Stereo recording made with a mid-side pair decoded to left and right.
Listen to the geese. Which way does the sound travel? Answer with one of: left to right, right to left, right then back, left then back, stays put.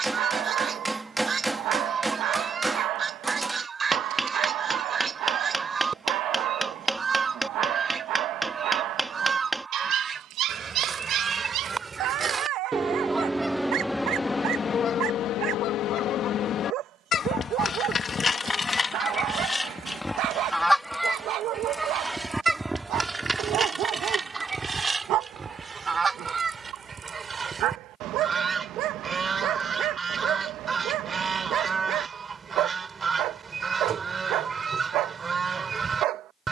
left then back.